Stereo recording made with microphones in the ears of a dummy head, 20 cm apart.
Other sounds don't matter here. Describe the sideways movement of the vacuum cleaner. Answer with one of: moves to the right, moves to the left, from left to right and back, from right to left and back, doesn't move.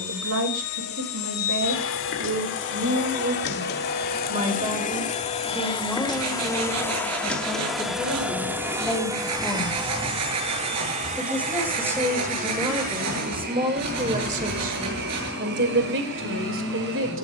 moves to the right.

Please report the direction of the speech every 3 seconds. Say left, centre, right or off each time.
right, right, centre, centre, right, right.